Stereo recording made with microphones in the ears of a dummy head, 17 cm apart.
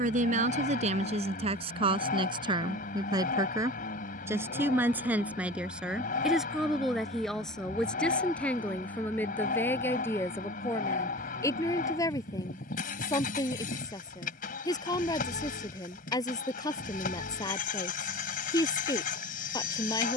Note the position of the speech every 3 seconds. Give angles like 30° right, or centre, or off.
30° right, 10° right, centre, 10° left, 20° left, 20° left, 20° left.